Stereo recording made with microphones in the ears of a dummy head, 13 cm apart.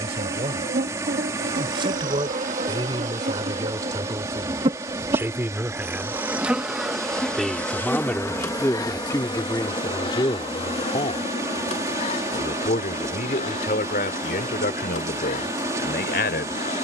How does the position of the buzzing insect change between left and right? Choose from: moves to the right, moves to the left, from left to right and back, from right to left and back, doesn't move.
moves to the left.